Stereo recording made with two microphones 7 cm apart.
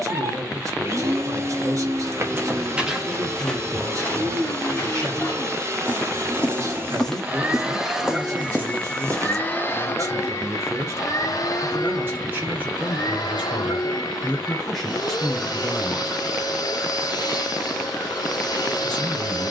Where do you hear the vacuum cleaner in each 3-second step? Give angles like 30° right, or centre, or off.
40° right, 40° right, 20° right, 40° left, 60° left, 60° left, 60° left.